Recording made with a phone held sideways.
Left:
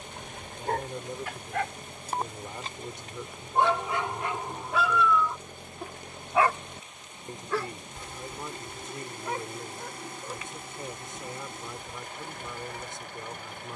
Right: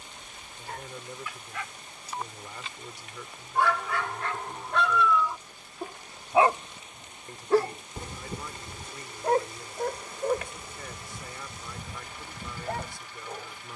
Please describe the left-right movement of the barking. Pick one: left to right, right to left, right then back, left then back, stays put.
left to right.